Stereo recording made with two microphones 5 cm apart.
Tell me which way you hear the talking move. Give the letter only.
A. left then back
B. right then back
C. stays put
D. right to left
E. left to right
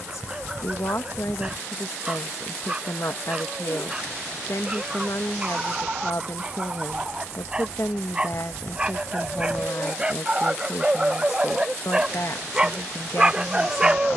C.